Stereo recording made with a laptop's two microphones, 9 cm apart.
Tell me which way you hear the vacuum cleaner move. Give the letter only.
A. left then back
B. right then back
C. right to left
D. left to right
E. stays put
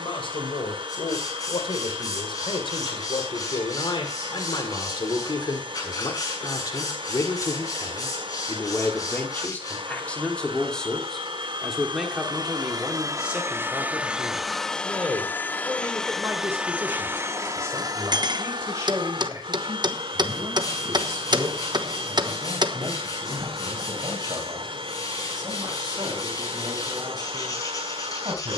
A.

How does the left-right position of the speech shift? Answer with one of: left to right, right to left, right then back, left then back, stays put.
left to right.